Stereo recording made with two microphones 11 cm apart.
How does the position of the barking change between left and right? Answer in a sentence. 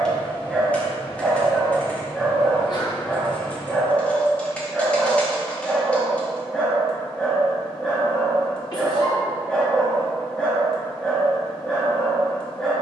In this clip you hear the barking stay put.